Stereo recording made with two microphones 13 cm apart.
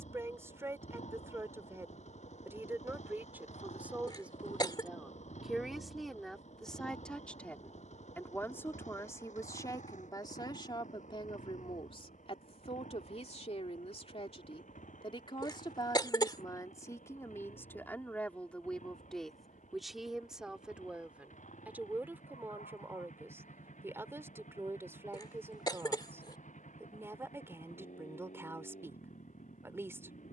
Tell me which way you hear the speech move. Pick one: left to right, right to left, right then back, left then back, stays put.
left then back.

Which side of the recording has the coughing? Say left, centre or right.
left.